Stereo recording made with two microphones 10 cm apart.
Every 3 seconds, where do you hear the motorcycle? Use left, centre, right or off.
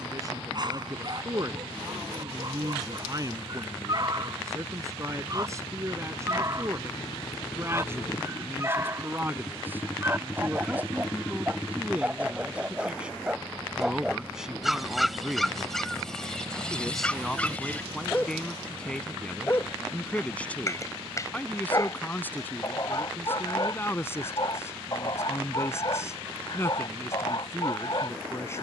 left, left, left, left, centre, right, right, right, right, right.